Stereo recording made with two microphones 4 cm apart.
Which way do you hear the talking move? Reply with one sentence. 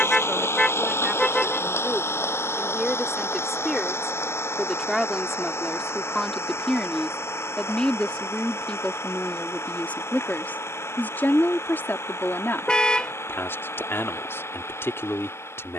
In this clip you hear the talking move to the left.